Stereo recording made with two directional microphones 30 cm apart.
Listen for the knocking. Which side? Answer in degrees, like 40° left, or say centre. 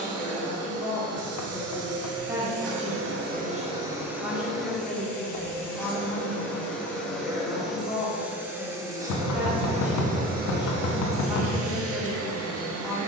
70° left.